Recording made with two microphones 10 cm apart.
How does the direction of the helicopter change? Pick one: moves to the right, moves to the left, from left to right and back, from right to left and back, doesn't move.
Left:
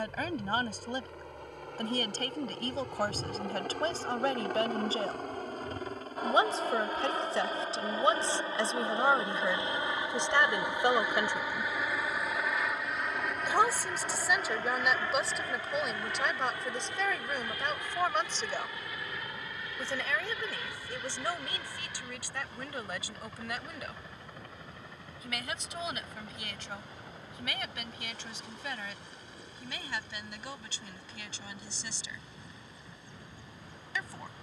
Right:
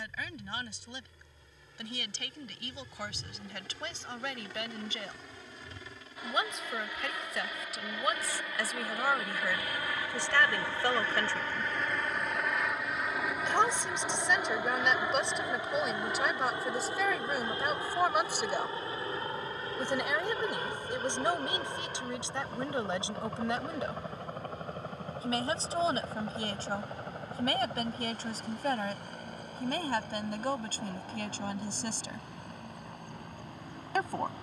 moves to the right.